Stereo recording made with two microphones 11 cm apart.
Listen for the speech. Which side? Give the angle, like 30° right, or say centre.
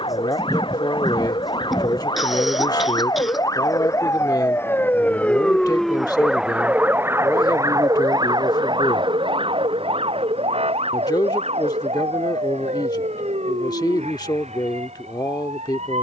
40° left.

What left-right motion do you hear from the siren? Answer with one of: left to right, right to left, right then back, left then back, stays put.
left to right.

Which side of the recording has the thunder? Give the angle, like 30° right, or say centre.
centre.